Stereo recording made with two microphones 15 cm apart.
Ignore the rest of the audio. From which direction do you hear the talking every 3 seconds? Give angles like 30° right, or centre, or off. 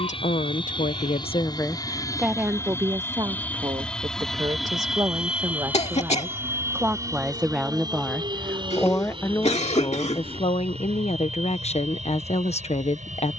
30° left, 30° right, centre, 40° left, 50° left.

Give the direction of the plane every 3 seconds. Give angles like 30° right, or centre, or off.
30° left, centre, 20° right, 40° right, 50° right.